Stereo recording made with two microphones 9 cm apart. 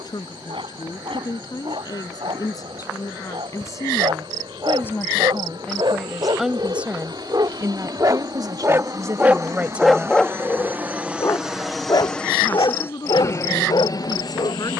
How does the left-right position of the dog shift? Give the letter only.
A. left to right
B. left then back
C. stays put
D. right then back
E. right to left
E.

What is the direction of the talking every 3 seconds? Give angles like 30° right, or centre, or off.
50° left, 30° left, 30° right, 20° right, 50° left.